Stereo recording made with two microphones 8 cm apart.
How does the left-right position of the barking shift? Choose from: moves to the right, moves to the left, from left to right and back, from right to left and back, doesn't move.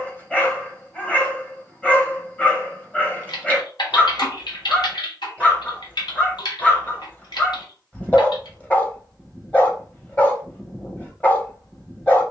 doesn't move.